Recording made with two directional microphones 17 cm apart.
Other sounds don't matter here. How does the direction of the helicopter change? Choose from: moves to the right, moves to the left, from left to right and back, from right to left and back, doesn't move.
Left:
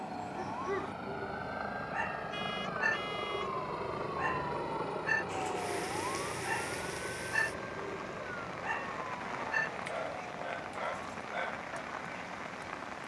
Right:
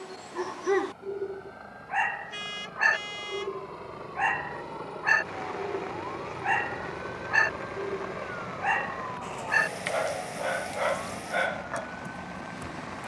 moves to the right.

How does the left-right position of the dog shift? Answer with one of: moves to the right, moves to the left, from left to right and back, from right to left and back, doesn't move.
doesn't move.